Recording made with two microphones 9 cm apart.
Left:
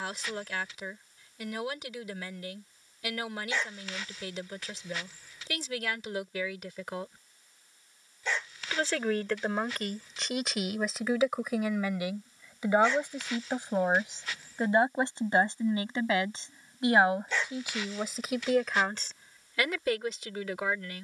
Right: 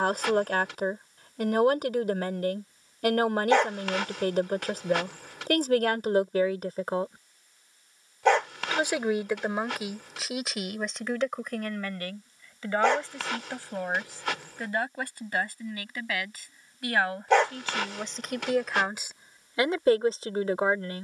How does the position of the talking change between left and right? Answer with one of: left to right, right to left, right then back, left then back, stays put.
left then back.